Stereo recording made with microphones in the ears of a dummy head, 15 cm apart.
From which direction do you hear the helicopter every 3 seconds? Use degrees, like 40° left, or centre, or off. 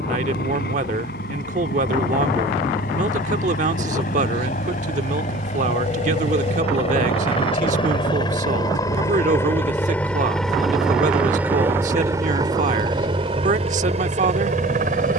60° left, 50° left, 30° left, centre, 30° right.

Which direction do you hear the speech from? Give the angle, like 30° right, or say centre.
50° right.